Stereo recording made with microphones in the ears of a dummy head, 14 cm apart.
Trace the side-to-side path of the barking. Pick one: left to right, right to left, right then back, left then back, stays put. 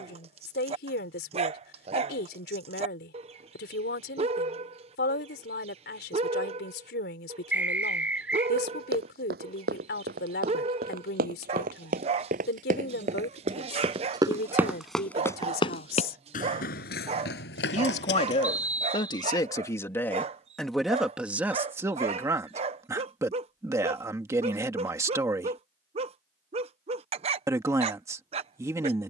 stays put.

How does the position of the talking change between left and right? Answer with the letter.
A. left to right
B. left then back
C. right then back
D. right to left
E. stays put
A.